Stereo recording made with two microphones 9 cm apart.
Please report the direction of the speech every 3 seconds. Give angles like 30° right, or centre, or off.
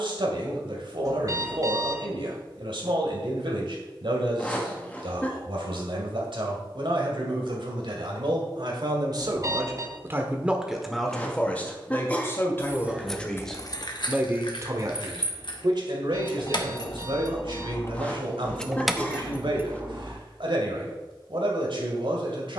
70° right, 70° right, 70° right, 20° right, centre, 70° right, 70° right, 70° right.